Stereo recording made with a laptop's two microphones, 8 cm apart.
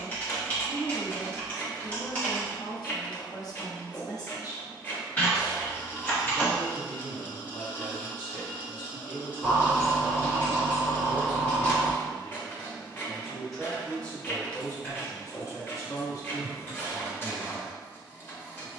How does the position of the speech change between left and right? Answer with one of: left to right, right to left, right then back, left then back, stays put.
right then back.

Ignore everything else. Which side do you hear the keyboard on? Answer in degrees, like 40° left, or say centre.
20° left.